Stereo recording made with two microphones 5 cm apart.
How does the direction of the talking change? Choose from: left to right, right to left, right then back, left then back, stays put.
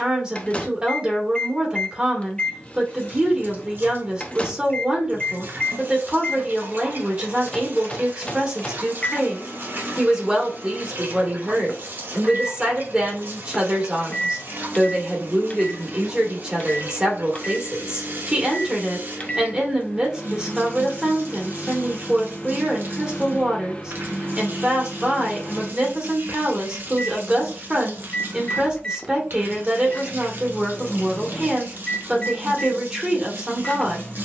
stays put.